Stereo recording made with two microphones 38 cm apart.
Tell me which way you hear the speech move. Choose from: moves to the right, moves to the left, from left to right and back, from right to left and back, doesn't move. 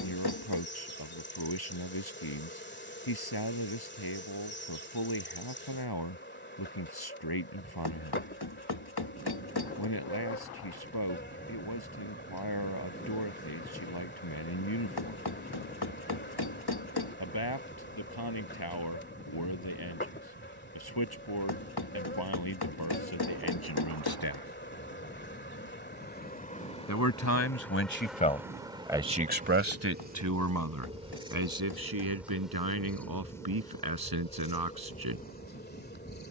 moves to the right.